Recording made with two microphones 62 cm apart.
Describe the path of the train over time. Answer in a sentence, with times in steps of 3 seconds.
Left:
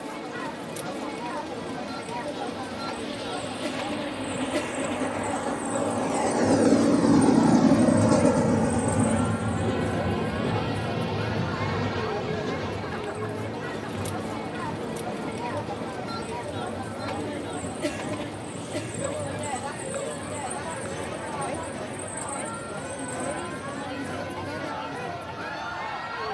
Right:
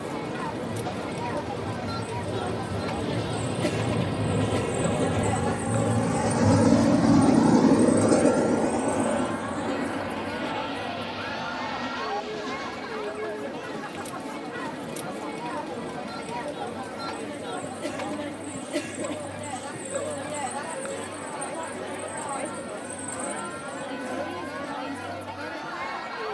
You can hear the train on the right from 0 s, in the centre from 6 s and on the left from 9 s.